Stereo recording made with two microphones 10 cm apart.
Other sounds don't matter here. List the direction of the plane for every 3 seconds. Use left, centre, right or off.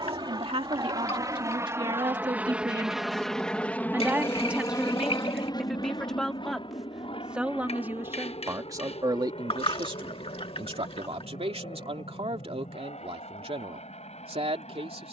right, left, left, left, left.